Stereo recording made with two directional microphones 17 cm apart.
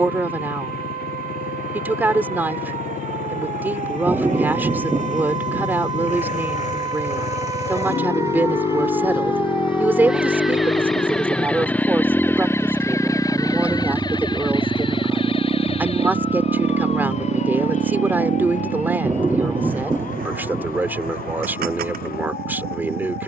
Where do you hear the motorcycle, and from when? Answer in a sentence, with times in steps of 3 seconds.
You can hear the motorcycle on the left from 0 s, in the centre from 12 s and on the right from 15 s.